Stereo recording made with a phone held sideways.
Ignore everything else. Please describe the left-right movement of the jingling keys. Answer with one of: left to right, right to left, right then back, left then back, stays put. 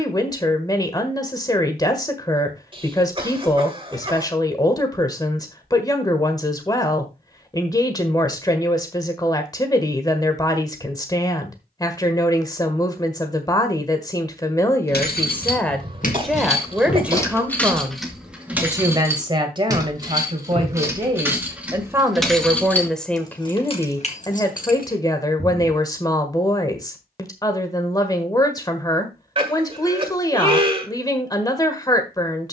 right then back.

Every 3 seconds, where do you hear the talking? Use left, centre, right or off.
left, left, left, left, left, centre, right, centre, left, left, left.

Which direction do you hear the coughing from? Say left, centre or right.
right.